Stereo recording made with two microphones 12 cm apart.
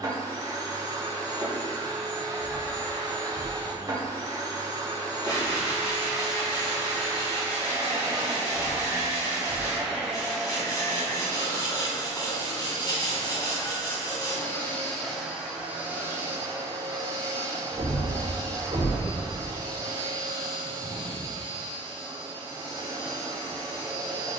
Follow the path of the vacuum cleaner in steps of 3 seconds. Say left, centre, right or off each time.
right, right, right, centre, left, right, right, right.